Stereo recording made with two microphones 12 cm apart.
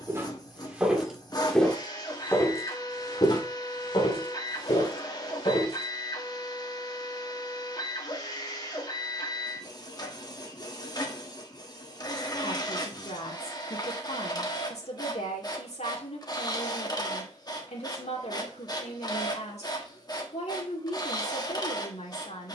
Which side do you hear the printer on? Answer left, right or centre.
left.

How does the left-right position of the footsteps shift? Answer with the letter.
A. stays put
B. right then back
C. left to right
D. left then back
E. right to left
E.